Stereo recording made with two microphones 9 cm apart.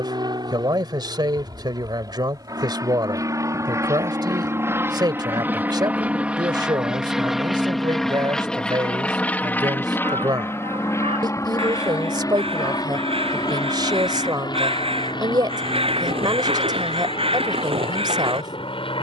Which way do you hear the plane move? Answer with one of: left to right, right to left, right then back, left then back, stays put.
right to left.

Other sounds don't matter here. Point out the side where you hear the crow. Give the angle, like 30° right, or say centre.
80° right.